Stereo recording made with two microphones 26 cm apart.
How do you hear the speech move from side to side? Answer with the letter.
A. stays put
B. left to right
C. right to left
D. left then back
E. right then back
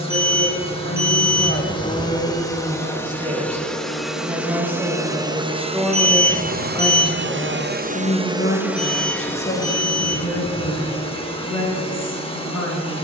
E.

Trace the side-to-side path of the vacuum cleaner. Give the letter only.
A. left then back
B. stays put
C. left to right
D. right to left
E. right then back
E.